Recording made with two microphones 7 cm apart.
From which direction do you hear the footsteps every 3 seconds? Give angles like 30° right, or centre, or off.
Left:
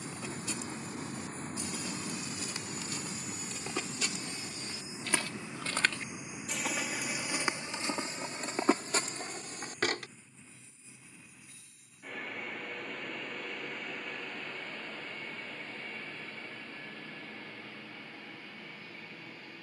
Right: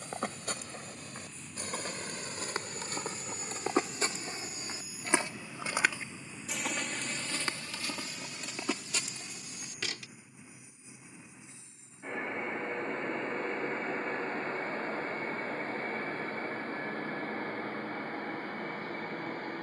50° right, 30° right, 20° left, 50° left, off, off, off.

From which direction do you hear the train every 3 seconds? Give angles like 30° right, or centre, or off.
40° left, 30° left, centre, 20° right, 30° right, 50° right, 50° right.